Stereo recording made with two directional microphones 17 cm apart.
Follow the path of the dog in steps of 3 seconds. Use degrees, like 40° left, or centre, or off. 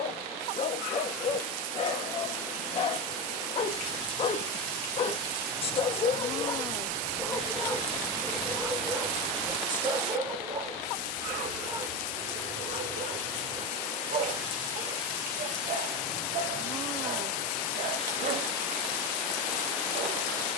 40° left, 40° left, 10° left, 30° right, 50° right, 50° right, 50° right.